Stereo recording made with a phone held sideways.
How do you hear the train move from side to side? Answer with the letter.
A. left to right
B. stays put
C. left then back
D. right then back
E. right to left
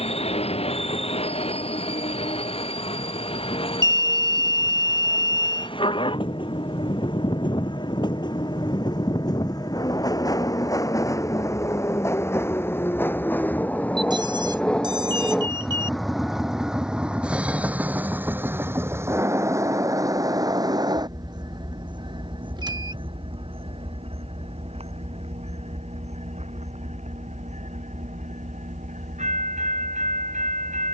A.